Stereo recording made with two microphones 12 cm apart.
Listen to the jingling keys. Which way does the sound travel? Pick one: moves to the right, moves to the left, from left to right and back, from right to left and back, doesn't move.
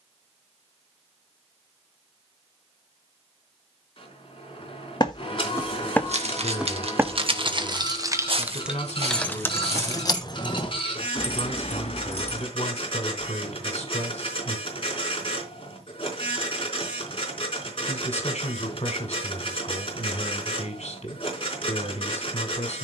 moves to the left.